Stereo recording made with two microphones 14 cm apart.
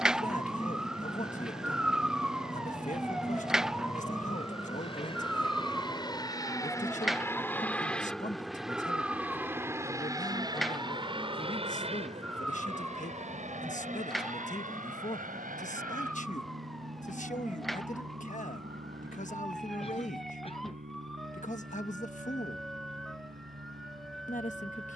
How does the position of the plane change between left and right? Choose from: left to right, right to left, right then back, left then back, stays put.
left to right.